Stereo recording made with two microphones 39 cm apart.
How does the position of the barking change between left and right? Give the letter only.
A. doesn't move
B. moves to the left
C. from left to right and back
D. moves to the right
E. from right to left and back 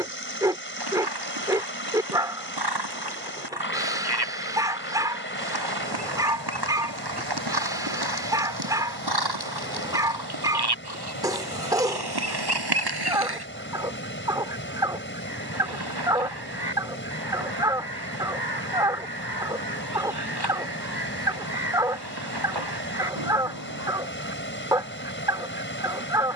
A.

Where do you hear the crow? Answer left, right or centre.
right.